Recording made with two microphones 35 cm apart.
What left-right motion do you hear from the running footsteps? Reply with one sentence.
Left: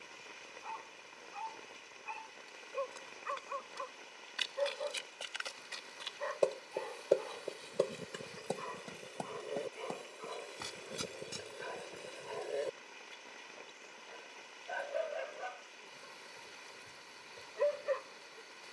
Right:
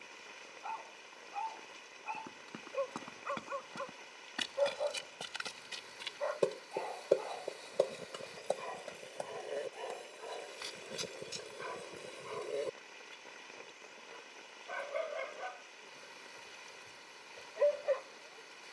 In this clip you hear the running footsteps move from right to left.